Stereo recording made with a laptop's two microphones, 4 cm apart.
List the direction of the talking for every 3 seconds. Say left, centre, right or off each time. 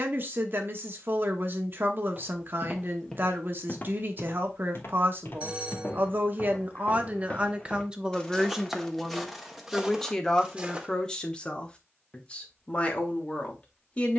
right, right, right, centre, left.